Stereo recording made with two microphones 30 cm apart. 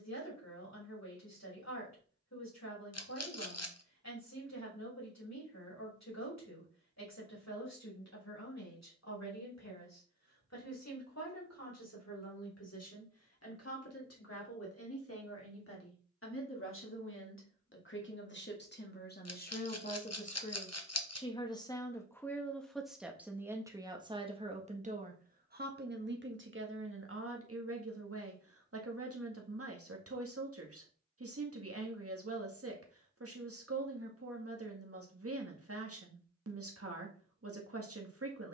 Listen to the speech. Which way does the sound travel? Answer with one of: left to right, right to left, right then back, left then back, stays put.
left to right.